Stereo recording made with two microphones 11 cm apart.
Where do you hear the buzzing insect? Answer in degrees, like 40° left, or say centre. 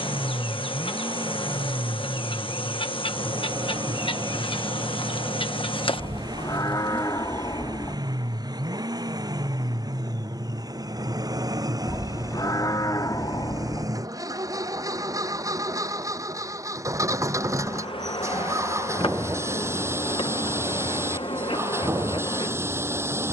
50° left.